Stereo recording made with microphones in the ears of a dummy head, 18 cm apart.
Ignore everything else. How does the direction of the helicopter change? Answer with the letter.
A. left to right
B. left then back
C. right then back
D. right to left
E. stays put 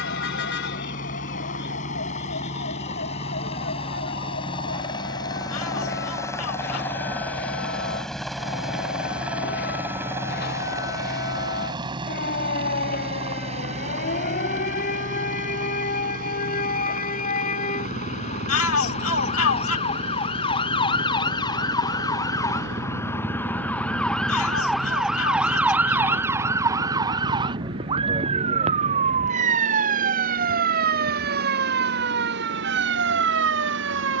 A.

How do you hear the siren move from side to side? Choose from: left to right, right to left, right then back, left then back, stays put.
left to right.